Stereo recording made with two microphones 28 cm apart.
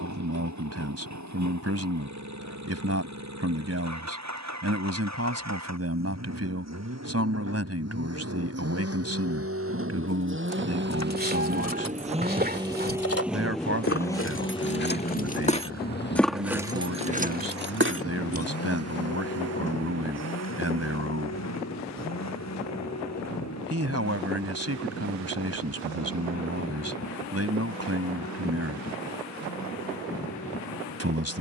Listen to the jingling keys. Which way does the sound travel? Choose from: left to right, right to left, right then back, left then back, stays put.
left to right.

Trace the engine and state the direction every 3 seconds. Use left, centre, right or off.
right, right, right, right, centre, left, left, left, left, left, left.